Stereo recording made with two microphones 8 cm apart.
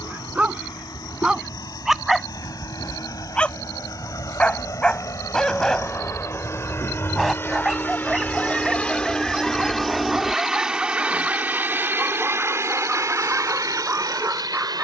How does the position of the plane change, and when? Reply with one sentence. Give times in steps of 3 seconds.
You can hear the plane on the left from 0 s, in the centre from 9 s and on the right from 12 s.